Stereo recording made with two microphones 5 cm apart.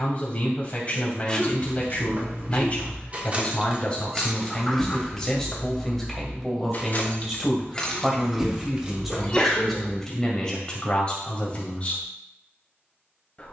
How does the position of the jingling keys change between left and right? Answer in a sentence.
You can hear the jingling keys go left and come back.